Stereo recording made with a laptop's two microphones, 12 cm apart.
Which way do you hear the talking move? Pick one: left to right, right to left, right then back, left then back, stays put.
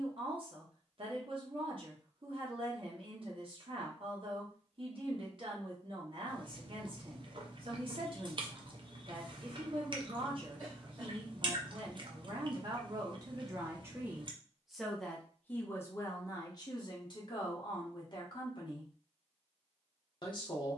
right to left.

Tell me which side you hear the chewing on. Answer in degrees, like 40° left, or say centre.
40° right.